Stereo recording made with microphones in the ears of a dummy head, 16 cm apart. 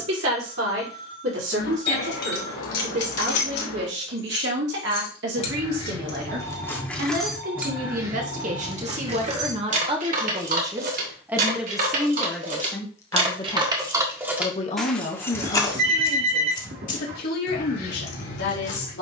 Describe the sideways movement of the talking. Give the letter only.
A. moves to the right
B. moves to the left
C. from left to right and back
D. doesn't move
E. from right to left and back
B.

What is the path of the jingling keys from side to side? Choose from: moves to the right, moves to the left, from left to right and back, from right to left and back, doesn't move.
from left to right and back.